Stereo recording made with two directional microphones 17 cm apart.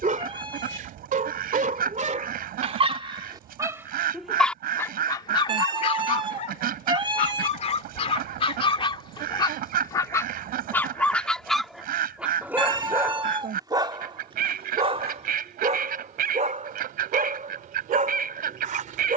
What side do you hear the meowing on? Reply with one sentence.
In this clip you hear the meowing on the right.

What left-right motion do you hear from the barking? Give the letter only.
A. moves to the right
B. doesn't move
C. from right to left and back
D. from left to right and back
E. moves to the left
C.